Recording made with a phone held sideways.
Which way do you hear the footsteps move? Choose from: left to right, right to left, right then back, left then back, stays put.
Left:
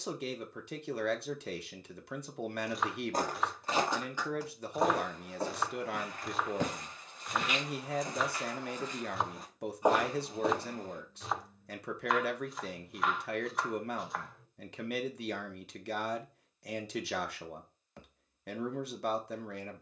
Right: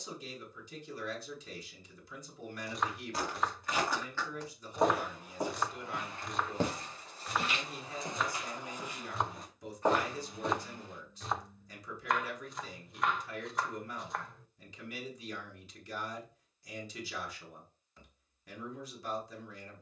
right then back.